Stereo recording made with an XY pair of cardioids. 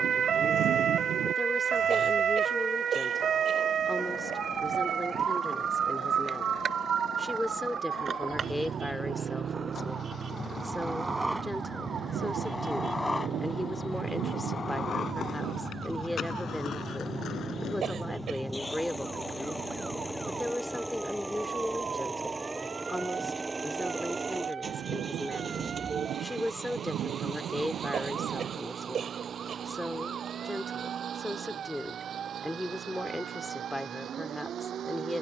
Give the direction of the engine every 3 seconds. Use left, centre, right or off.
left, left, left, left, left, left, centre, centre, right, right, right, right.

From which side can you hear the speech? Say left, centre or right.
centre.